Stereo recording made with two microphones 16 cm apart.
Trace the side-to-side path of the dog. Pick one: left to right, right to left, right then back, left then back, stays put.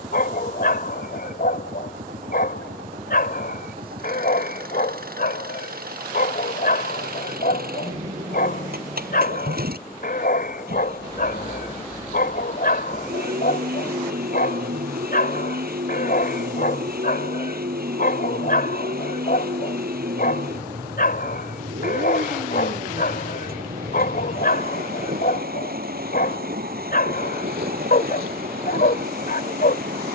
stays put.